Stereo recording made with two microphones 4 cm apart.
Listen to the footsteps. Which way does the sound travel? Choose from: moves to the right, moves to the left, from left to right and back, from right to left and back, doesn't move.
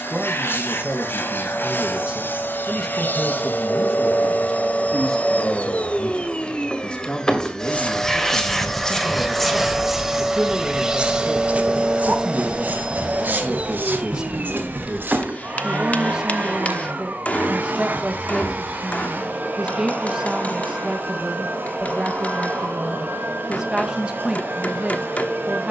moves to the right.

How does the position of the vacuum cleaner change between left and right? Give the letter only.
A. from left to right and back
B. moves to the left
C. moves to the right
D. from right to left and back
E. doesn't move
C.